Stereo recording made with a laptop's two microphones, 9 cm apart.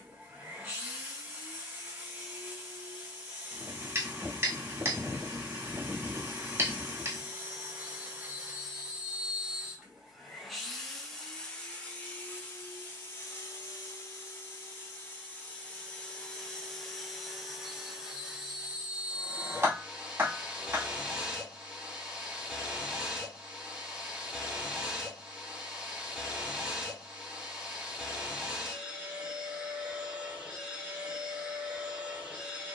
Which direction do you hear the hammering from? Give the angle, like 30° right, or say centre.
30° right.